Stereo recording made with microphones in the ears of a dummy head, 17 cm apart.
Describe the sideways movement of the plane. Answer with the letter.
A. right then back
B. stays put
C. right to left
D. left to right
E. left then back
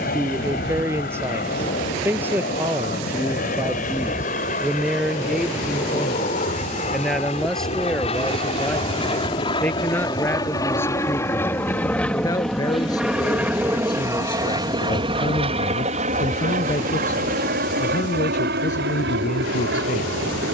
D.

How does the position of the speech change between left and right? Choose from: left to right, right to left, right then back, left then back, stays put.
right to left.